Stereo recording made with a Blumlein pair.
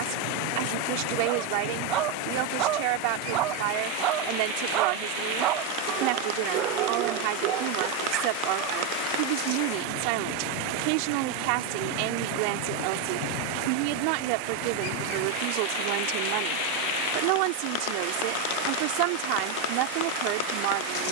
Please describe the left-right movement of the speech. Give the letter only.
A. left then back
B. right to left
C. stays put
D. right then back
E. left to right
C.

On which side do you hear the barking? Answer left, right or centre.
right.